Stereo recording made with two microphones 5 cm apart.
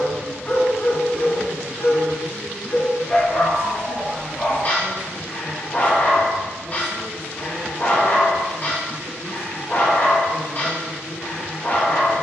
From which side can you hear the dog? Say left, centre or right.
left.